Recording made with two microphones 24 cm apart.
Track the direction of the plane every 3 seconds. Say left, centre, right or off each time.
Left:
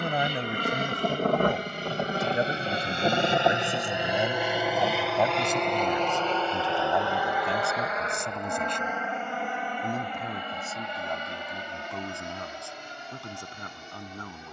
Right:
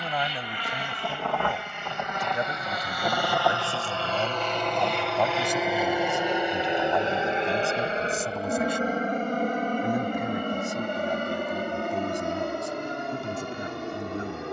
left, centre, right, right, right.